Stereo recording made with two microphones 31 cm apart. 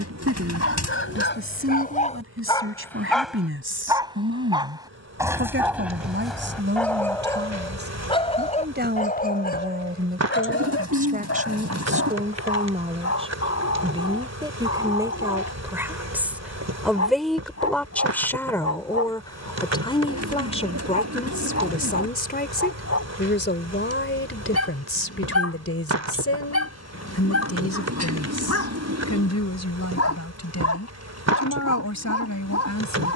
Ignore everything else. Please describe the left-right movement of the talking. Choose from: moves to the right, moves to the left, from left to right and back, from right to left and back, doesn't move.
moves to the left.